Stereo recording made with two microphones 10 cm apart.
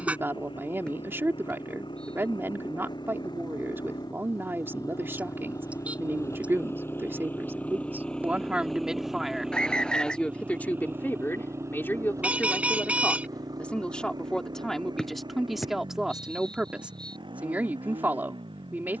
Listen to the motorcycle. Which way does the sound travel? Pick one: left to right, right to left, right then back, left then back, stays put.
left to right.